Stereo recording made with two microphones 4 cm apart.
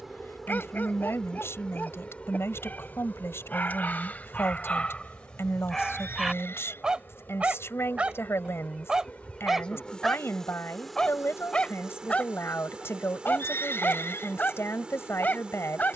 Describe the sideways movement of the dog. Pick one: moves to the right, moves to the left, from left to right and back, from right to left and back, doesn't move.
from left to right and back.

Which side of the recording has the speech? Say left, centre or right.
left.